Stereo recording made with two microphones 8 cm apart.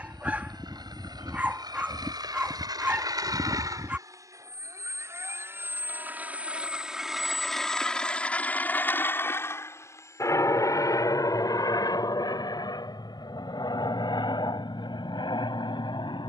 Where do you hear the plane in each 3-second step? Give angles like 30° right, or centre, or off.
70° right, 40° right, centre, 40° left, 50° left, 60° left.